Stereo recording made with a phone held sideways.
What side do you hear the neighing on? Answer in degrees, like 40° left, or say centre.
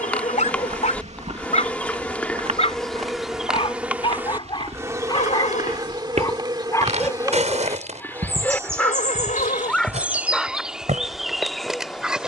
70° left.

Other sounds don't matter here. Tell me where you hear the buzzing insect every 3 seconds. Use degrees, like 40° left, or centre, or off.
10° left, 20° right, 30° right, 10° right.